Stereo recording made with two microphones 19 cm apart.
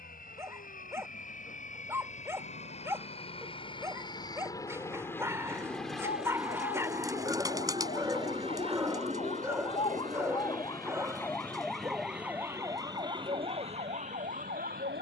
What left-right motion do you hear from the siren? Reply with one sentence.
You can hear the siren move to the right.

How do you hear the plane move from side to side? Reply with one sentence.
In this clip you hear the plane go from the left side to the right.